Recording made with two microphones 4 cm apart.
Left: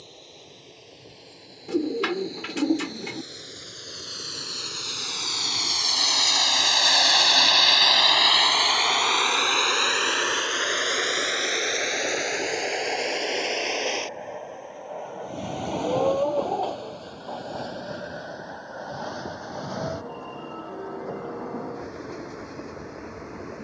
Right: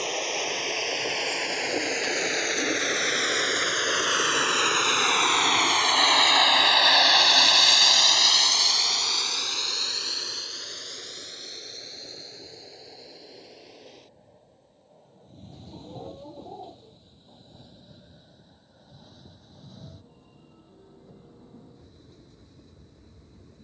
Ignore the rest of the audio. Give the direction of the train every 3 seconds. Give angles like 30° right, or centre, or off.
70° right, 50° right, centre, 50° left, 60° left, 70° left, 70° left, 80° left.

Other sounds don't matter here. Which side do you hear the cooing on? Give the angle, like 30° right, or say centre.
60° left.